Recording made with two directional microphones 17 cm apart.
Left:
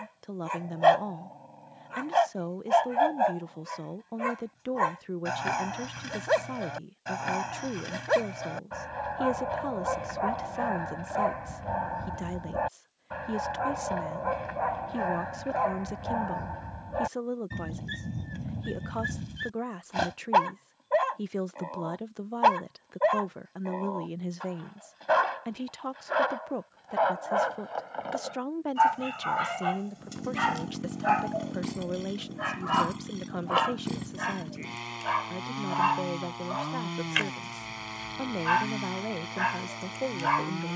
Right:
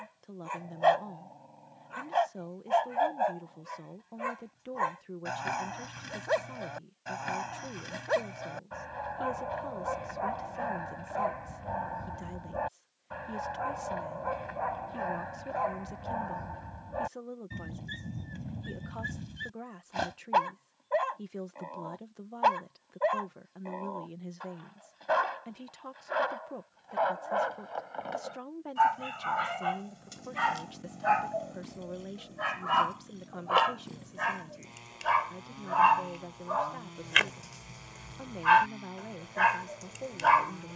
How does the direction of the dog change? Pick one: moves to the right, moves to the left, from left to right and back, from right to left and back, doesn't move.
moves to the right.